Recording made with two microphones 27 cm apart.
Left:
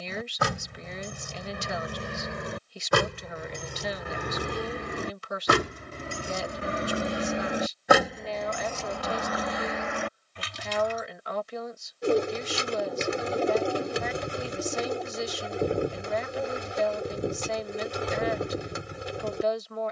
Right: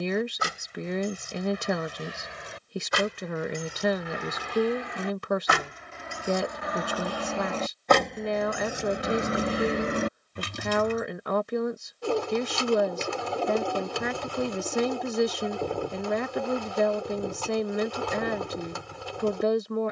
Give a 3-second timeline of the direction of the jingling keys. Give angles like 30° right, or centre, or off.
60° left, 50° left, 10° left, 40° right, off, off, off.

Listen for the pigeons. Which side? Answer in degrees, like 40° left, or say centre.
20° left.